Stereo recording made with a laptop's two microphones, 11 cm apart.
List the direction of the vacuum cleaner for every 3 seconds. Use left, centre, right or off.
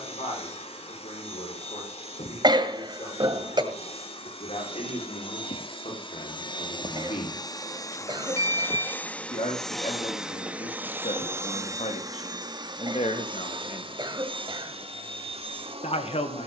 left, left, left, centre, right, right.